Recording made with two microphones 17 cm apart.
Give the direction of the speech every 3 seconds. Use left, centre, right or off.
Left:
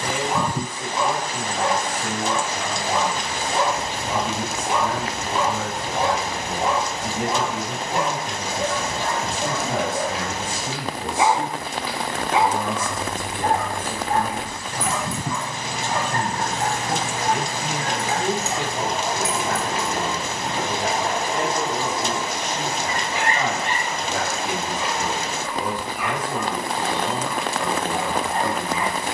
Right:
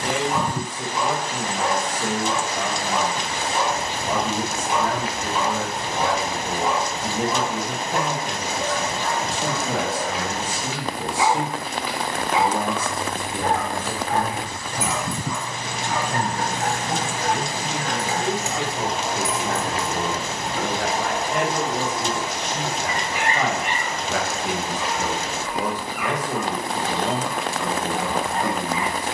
right, right, right, right, right, centre, right, right, right, right.